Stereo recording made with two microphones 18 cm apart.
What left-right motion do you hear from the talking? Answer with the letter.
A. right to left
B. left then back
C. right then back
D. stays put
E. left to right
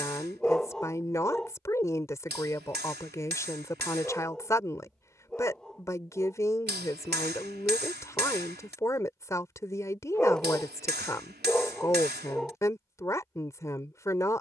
D.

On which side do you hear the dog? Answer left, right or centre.
centre.